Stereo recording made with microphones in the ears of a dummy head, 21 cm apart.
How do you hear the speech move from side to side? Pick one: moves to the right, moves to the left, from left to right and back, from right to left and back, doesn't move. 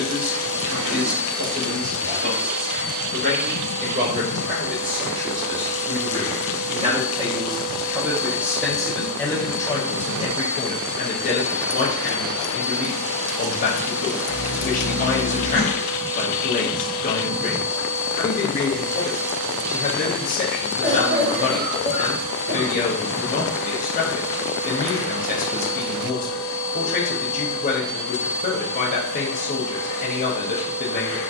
moves to the left.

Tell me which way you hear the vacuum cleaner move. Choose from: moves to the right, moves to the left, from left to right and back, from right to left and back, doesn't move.
doesn't move.